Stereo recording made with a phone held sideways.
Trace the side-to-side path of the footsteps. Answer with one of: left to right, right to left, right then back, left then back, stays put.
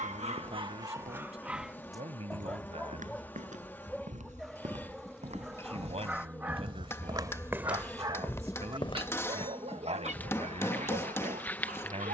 right to left.